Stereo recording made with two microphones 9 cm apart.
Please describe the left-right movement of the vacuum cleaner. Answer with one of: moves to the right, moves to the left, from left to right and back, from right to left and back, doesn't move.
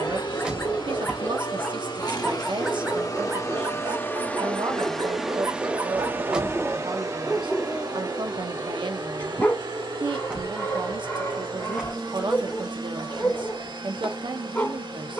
moves to the right.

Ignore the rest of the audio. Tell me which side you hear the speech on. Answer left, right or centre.
right.